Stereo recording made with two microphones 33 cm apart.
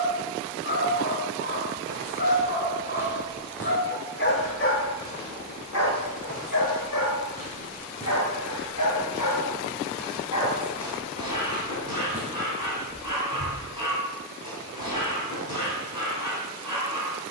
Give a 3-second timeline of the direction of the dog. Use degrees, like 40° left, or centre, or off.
30° left, 40° left, 60° left, 70° left, 70° left, 70° left.